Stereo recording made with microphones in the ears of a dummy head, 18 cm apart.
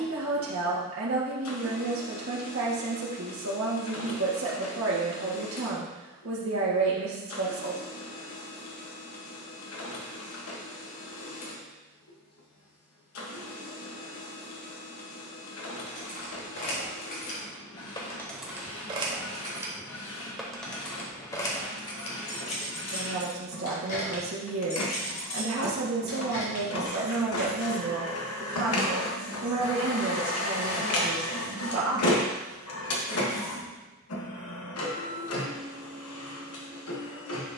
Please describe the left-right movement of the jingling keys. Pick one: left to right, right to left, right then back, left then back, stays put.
right then back.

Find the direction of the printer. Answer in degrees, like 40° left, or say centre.
80° left.